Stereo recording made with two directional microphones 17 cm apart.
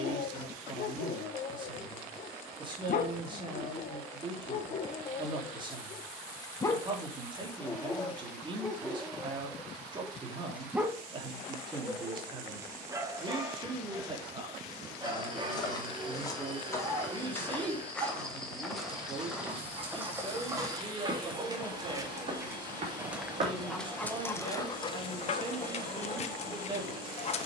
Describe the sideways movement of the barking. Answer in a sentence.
You can hear the barking go right and come back.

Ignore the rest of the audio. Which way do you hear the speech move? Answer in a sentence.
In this clip you hear the speech stay in one place.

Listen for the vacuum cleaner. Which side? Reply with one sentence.
In this clip you hear the vacuum cleaner on the right.